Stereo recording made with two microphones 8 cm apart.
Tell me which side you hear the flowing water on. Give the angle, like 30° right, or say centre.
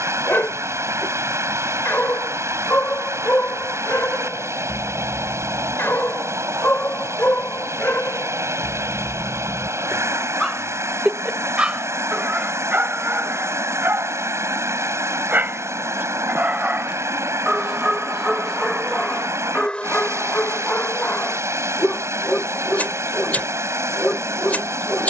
40° right.